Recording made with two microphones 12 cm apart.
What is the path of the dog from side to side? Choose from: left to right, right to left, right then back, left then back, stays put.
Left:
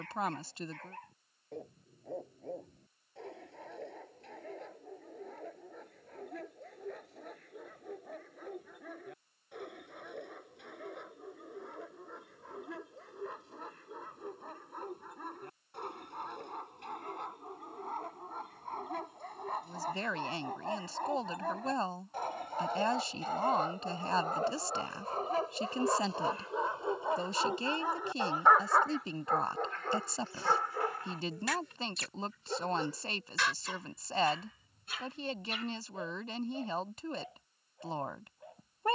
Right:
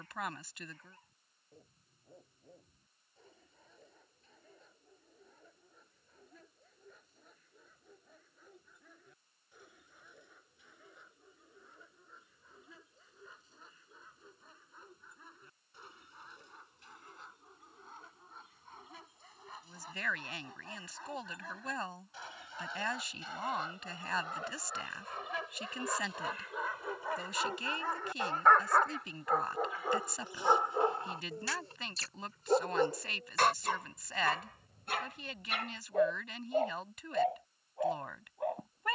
left to right.